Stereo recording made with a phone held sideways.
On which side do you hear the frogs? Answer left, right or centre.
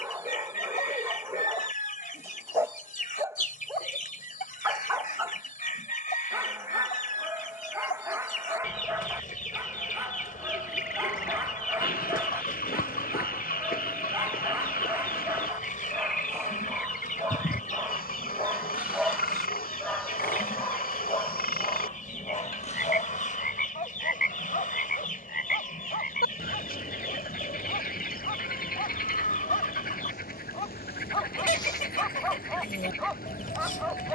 left.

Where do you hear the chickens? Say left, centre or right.
left.